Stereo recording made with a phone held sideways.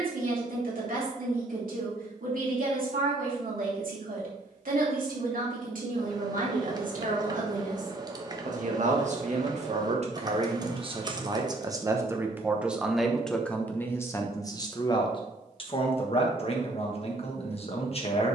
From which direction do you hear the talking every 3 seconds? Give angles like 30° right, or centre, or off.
70° right, 70° right, 70° right, 40° right, 10° left, 40° left.